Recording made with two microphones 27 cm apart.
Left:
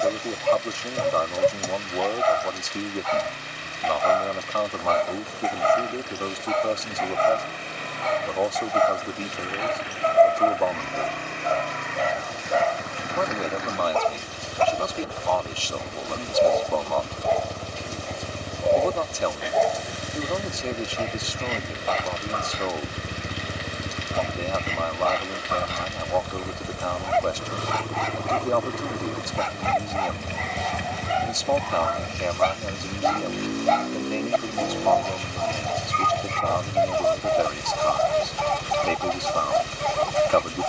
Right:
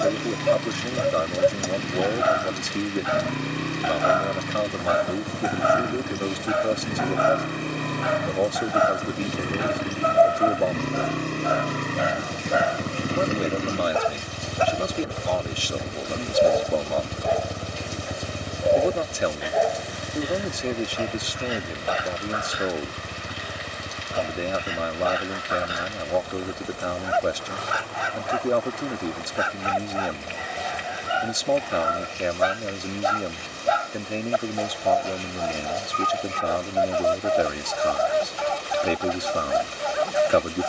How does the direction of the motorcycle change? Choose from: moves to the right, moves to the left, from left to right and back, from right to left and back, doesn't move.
moves to the left.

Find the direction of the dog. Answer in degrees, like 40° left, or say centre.
10° right.